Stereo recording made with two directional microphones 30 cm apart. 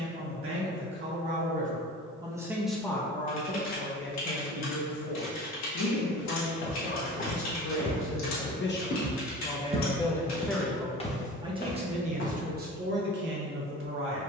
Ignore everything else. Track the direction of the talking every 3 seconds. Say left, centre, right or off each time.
right, left, left, centre, right.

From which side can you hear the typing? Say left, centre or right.
left.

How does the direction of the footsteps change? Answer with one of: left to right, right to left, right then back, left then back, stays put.
right then back.